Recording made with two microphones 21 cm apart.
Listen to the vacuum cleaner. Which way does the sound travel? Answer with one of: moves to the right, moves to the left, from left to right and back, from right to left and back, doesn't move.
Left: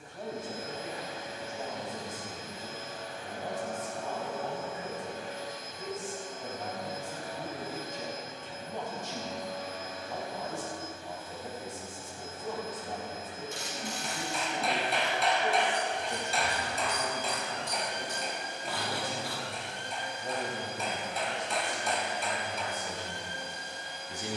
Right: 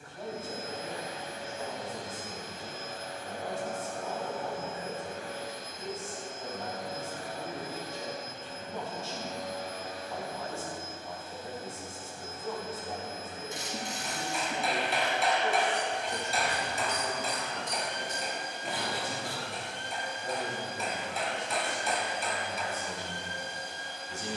doesn't move.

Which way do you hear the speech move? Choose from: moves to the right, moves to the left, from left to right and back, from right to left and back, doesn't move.
doesn't move.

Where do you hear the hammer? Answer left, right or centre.
centre.